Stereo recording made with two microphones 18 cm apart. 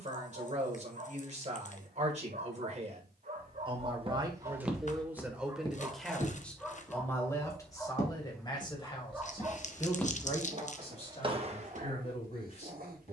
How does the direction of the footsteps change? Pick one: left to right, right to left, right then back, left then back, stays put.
left then back.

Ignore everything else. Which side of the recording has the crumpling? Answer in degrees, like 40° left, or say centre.
50° left.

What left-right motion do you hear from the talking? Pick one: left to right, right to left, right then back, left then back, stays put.
right to left.